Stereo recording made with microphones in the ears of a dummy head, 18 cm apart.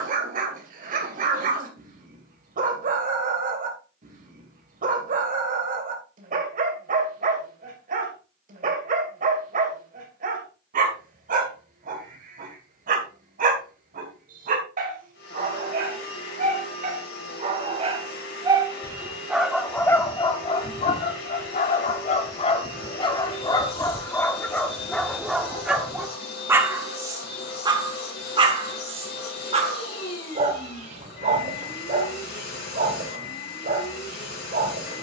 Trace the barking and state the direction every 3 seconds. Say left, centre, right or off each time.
right, right, right, right, right, right, centre, left, centre, right, right, right.